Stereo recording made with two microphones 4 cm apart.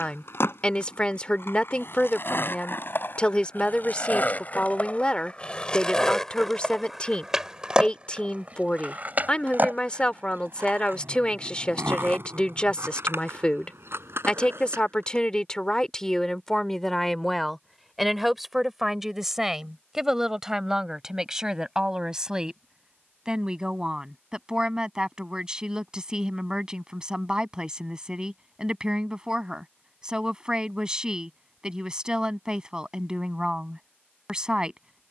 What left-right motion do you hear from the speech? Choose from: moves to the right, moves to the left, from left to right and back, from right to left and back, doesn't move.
moves to the right.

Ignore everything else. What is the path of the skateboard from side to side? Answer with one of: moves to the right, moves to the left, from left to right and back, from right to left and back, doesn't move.
moves to the right.